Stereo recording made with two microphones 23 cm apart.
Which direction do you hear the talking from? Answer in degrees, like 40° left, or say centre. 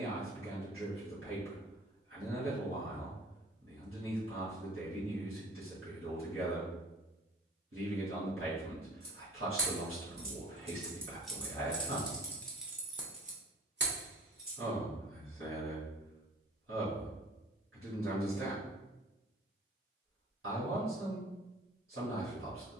60° right.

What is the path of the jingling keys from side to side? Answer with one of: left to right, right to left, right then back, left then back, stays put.
left then back.